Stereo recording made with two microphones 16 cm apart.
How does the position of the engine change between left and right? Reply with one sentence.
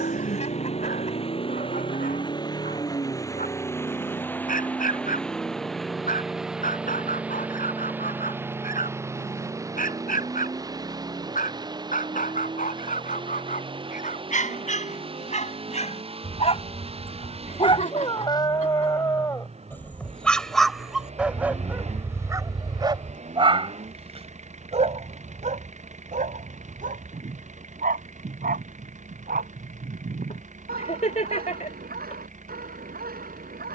In this clip you hear the engine travel towards the right.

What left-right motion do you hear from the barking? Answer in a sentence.
In this clip you hear the barking travel towards the right.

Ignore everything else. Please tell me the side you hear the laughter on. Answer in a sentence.
You can hear the laughter on the left.